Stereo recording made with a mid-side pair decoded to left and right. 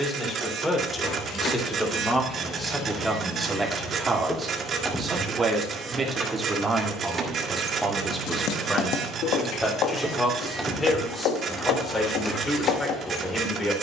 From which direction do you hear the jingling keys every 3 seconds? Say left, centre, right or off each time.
left, centre, right, centre, left.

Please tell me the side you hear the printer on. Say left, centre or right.
right.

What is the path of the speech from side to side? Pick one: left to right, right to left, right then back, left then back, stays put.
right then back.